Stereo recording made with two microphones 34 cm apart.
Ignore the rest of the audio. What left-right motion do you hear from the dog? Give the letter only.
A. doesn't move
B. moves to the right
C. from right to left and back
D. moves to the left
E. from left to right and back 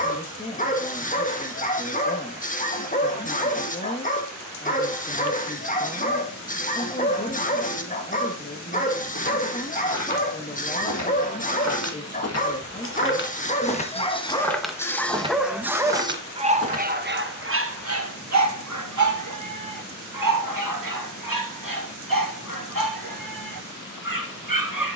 B.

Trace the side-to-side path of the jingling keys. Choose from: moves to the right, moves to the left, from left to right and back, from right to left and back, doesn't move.
moves to the right.